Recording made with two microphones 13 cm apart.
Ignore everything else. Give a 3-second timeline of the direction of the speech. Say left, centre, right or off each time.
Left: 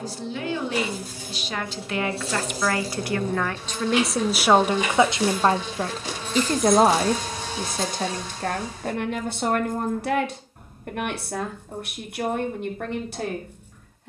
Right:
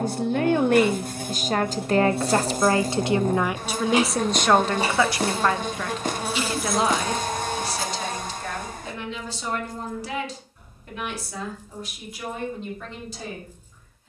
right, centre, left, left, left.